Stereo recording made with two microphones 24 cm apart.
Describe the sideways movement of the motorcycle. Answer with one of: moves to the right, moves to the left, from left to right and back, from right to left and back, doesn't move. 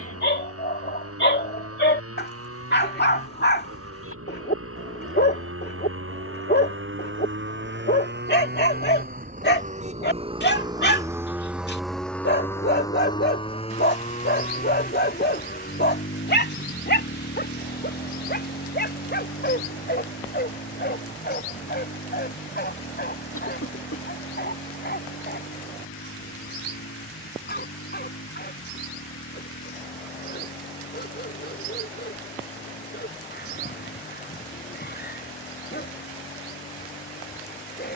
moves to the left.